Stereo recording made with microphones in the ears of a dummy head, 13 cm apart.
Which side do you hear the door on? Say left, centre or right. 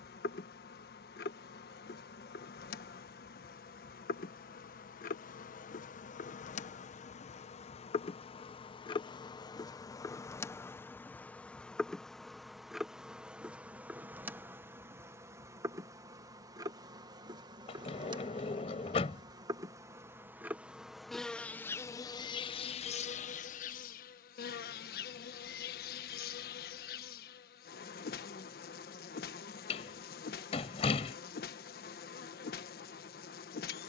left.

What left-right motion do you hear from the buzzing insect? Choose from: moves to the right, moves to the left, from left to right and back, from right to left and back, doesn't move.
from left to right and back.